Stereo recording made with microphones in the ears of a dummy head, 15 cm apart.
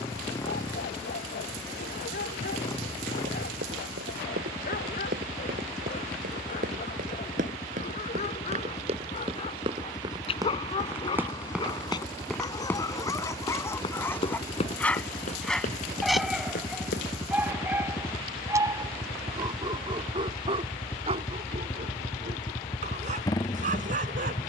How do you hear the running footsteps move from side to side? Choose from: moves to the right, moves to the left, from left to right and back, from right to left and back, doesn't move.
moves to the left.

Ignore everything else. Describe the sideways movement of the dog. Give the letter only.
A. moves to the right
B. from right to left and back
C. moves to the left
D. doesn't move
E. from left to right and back
A.